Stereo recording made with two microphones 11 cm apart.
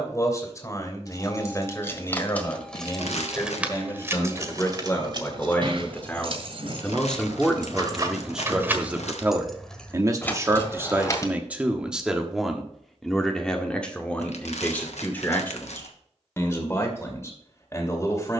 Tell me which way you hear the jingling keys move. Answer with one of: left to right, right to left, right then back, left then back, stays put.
right then back.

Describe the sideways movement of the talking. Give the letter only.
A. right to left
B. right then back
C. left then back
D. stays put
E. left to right
B.